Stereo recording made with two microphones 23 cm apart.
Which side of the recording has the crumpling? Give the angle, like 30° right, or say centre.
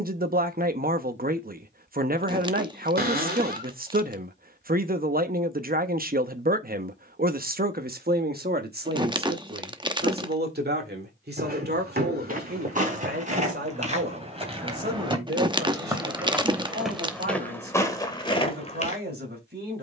20° right.